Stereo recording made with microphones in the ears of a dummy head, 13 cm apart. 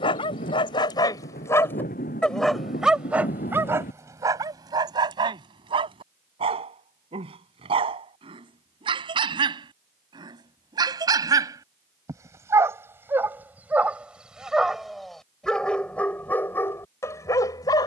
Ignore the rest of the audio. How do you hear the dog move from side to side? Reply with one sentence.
In this clip you hear the dog go right and come back.